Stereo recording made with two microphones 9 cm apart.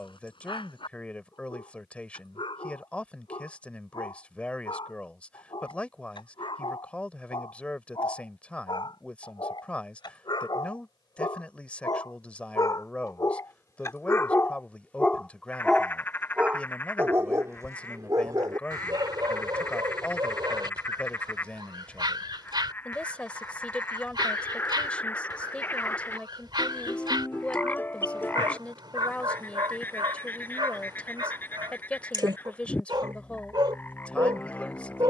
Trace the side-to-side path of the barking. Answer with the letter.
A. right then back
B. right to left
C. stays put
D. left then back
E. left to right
E.